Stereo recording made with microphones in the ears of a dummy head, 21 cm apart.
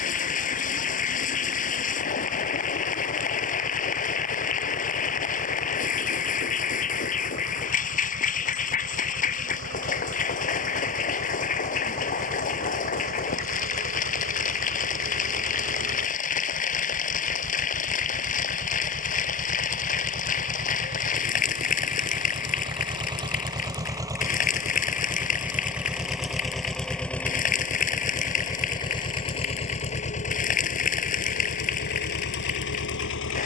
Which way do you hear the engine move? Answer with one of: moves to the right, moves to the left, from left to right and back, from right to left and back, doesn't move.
moves to the left.